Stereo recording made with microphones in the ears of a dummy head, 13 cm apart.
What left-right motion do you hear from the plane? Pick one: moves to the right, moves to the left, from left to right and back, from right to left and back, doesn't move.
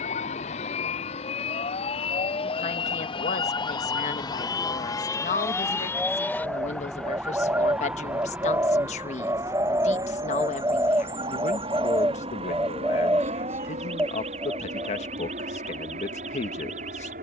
moves to the right.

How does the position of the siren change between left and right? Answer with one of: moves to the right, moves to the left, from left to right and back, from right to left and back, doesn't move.
moves to the right.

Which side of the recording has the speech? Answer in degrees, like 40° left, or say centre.
50° left.